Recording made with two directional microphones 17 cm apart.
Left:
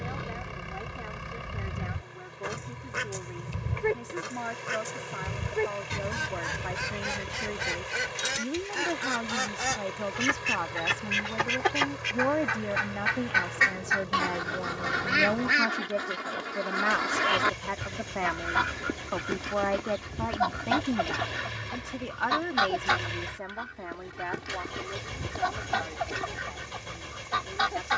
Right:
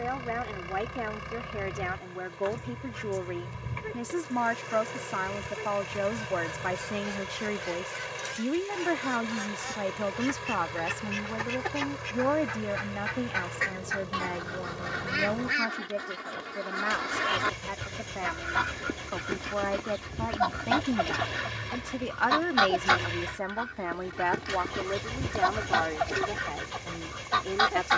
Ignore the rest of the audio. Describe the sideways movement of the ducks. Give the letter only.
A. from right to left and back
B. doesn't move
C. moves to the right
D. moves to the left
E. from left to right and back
C.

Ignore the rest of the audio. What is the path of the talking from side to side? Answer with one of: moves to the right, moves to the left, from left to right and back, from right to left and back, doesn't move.
from right to left and back.